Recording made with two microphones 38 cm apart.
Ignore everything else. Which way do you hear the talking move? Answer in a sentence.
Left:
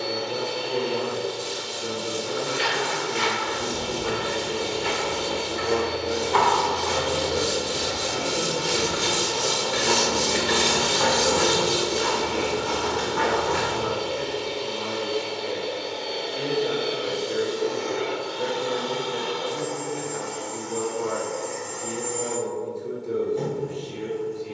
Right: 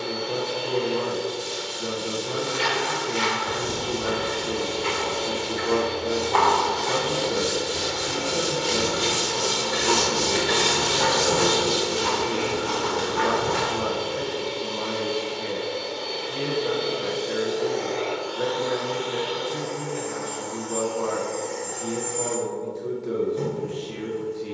In this clip you hear the talking stay in one place.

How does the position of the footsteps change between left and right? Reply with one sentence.
In this clip you hear the footsteps go left and come back.